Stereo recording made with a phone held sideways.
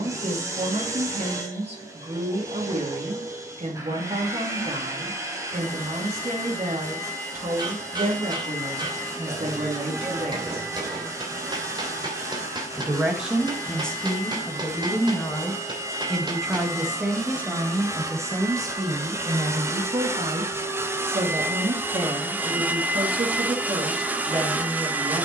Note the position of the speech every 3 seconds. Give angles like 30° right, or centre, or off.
50° right, 50° right, 50° right, 50° right, 10° left, centre, 30° right, 40° right, 40° right.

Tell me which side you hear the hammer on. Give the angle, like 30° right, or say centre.
30° right.